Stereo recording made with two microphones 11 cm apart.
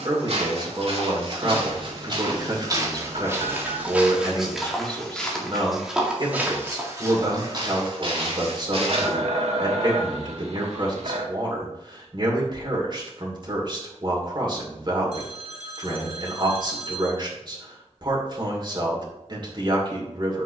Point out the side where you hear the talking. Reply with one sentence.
In this clip you hear the talking on the right.